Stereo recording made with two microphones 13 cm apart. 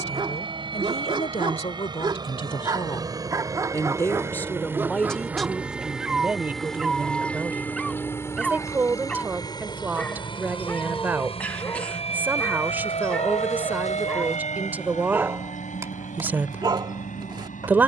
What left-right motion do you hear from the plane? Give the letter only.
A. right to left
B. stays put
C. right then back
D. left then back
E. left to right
A.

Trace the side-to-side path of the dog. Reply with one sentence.
In this clip you hear the dog go left and come back.